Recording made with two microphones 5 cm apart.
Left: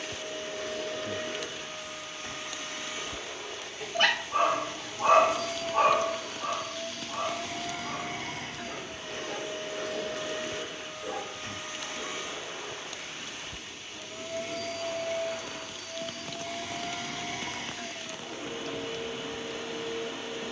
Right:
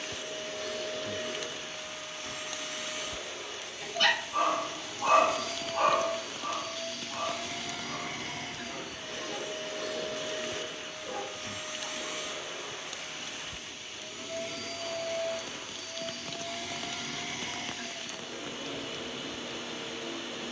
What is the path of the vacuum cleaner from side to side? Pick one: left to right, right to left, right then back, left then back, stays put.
stays put.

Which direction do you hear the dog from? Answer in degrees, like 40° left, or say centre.
40° left.